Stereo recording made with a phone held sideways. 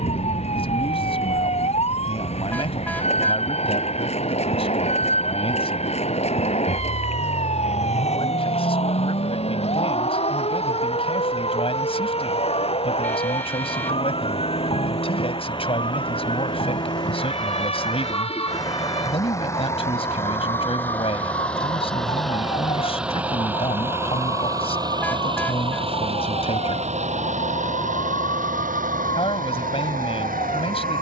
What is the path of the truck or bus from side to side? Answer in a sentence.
In this clip you hear the truck or bus move from left to right.